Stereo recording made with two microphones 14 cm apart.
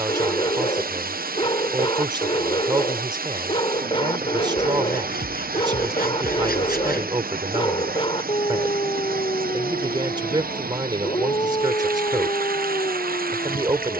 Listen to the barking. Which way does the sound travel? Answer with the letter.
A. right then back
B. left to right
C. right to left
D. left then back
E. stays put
E.